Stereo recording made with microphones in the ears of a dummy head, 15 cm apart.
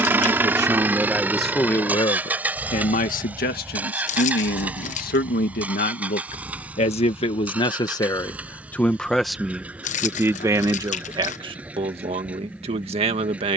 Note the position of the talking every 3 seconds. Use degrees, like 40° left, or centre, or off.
centre, 60° left, 30° left, 20° right, 40° right.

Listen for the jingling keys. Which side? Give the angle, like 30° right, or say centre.
40° left.